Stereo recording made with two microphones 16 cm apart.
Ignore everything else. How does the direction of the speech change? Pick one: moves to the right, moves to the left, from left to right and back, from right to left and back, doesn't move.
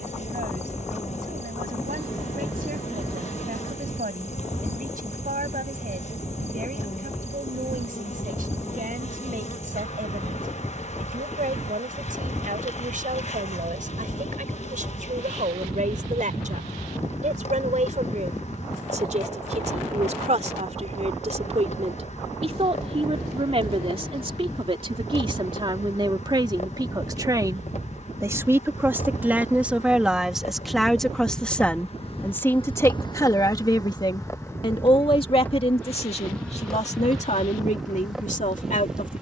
moves to the left.